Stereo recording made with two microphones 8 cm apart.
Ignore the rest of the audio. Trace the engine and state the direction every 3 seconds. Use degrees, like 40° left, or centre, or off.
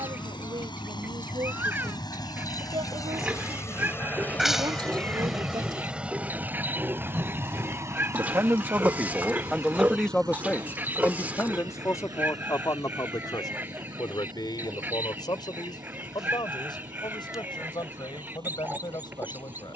70° left, 20° left, 30° right, 50° right, 60° right, 60° right, 70° right.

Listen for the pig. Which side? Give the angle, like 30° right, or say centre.
20° right.